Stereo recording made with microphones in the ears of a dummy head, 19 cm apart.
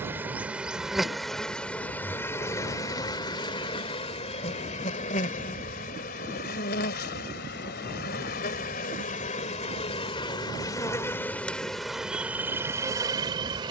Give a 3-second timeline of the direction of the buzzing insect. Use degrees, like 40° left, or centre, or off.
centre, 30° left, 50° left, 20° left, 10° right.